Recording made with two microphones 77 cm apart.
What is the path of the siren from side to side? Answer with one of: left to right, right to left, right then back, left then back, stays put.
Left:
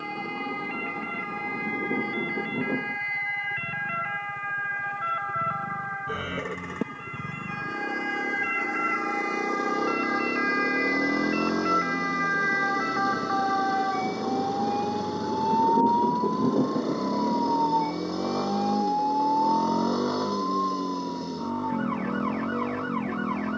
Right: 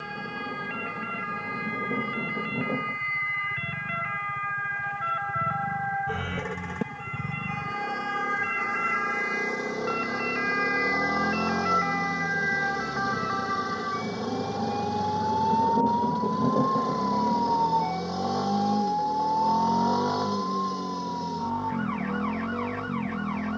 right to left.